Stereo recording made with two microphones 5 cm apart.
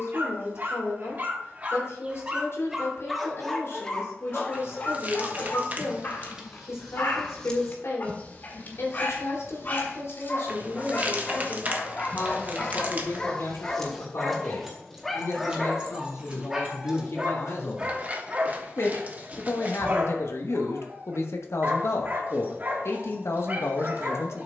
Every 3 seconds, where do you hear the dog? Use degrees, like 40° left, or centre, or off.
40° right, 20° left, 40° left, 30° left, 10° left, 10° right, 40° right, 40° right.